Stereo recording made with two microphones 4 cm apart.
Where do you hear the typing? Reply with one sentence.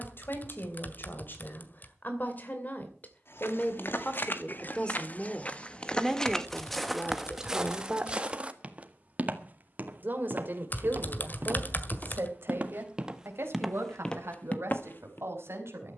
In this clip you hear the typing on the left.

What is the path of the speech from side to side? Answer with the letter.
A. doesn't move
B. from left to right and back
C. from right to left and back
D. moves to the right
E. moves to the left
D.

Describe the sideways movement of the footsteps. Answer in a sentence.
You can hear the footsteps move from left to right and back again.